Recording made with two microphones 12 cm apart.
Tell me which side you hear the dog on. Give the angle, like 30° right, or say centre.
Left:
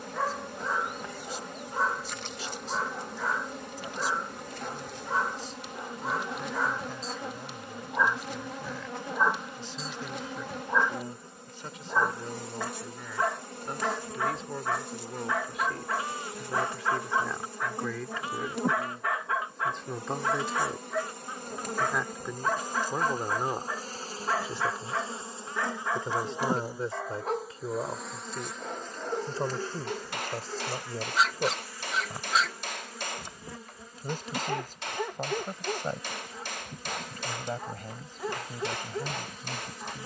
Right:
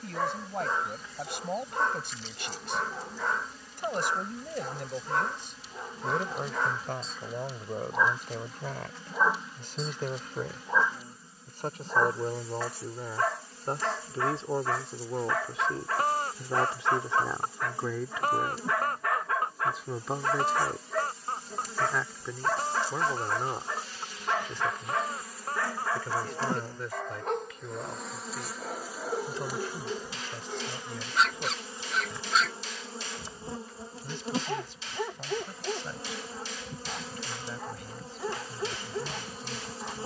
centre.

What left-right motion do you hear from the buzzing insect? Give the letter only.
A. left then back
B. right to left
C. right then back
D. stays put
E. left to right
E.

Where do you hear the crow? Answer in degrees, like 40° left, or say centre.
50° right.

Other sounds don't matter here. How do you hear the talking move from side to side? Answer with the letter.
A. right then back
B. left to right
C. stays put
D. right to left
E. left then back
D.